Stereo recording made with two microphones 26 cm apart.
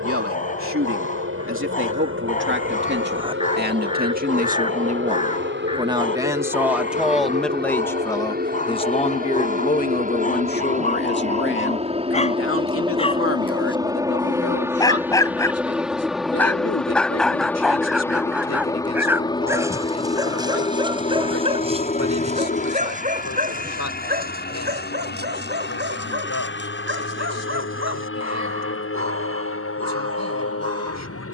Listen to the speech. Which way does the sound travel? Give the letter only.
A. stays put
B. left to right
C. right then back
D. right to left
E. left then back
D.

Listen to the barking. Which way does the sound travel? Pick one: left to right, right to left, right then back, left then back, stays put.
left to right.